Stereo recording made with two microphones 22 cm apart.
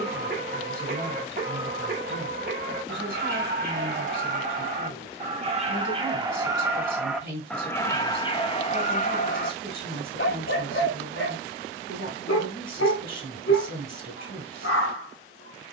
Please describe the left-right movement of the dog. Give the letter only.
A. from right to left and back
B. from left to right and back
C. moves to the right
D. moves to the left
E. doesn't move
D.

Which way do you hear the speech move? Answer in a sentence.
You can hear the speech stay in one place.